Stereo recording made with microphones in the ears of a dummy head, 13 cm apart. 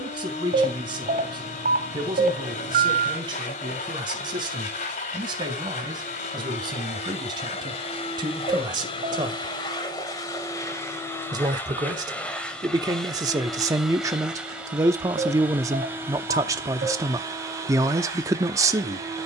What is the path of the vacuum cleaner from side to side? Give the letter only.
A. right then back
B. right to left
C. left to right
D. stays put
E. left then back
C.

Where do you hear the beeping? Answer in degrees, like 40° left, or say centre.
60° right.